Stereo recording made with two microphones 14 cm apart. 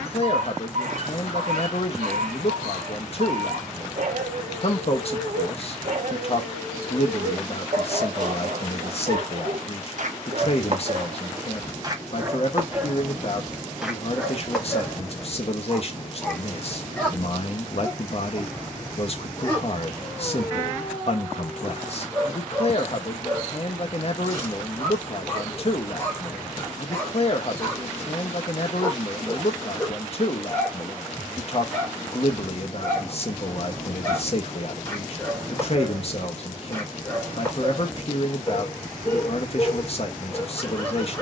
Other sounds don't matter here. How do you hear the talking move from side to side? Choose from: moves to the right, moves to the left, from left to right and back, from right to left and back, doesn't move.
doesn't move.